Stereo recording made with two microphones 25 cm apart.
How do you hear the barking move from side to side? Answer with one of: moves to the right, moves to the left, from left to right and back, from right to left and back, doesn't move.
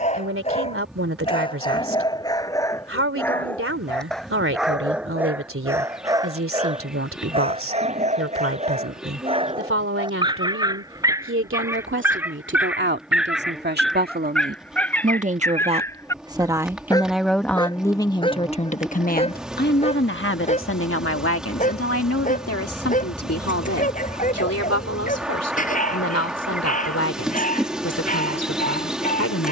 from left to right and back.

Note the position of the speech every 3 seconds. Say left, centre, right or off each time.
right, right, right, right, right, centre, left, left, left, left.